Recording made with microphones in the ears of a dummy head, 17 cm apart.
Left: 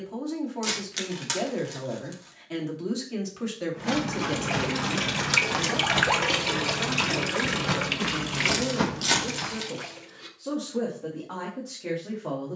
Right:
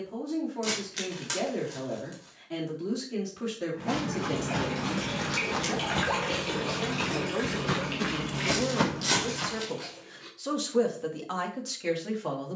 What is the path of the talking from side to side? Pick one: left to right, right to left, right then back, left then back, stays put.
left to right.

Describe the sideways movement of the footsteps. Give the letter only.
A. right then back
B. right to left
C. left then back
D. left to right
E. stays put
D.